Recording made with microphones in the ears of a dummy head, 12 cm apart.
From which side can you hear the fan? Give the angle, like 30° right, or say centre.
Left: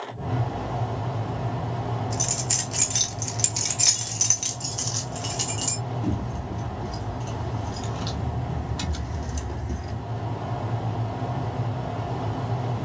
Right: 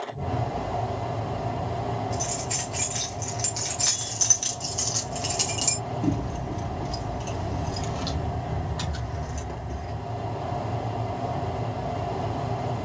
10° right.